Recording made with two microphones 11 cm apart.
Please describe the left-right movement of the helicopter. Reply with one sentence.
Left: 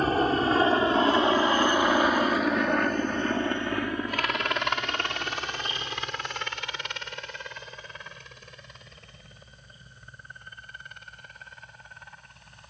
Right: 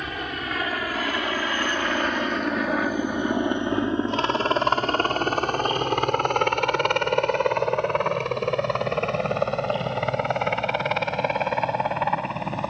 In this clip you hear the helicopter move from left to right.